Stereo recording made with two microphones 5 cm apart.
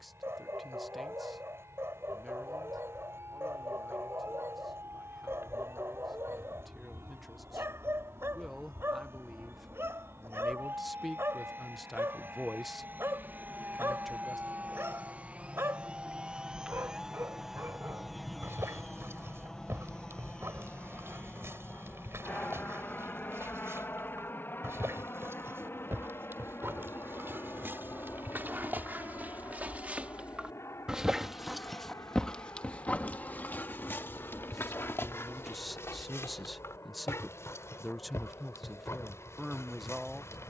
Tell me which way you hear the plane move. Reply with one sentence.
You can hear the plane go from the right side to the left.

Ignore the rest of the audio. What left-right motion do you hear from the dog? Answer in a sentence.
You can hear the dog move to the left.